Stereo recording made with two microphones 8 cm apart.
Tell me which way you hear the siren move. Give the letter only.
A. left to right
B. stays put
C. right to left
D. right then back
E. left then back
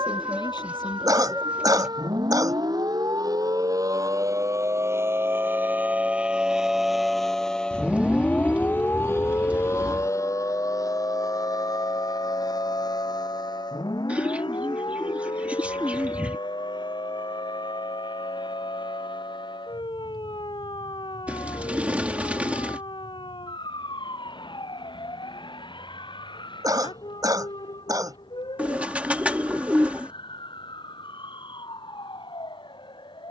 C.